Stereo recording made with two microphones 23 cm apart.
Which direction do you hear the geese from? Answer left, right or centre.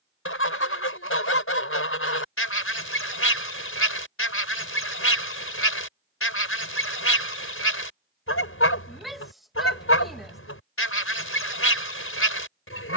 left.